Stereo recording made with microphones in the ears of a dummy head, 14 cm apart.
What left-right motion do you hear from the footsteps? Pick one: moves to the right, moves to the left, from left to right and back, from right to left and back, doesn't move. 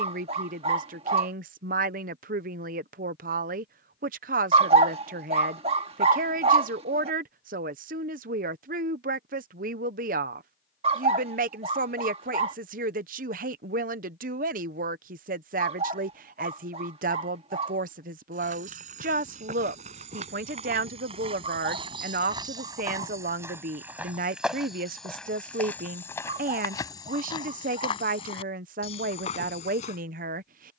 moves to the left.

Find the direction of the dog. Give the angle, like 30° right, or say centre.
40° right.